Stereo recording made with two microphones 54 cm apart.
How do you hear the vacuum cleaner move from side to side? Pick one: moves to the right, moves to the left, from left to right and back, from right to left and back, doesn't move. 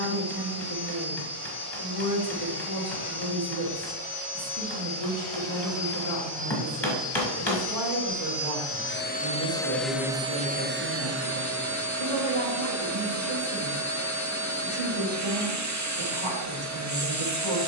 moves to the right.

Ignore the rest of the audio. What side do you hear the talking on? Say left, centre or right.
right.